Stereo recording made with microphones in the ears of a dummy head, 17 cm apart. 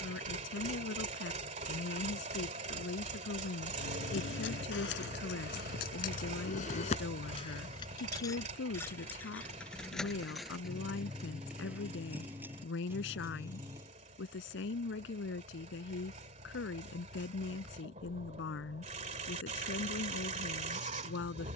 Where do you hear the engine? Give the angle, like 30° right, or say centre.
40° right.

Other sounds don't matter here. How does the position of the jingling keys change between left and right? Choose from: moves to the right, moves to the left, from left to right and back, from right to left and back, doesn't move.
moves to the right.